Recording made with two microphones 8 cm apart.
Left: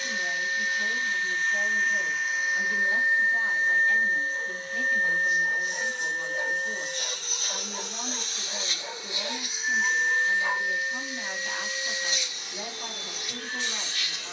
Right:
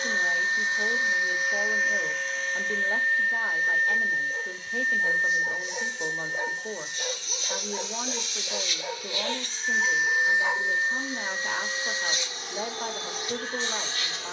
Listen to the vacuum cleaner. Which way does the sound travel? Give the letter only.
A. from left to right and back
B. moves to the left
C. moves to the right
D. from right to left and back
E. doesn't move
D.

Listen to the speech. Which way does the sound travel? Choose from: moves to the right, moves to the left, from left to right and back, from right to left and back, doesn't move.
doesn't move.